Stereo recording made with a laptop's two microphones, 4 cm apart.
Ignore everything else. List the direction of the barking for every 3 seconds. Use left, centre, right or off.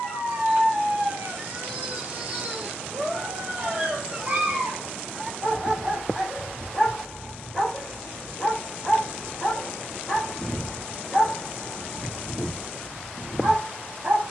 right, right, centre, centre, right.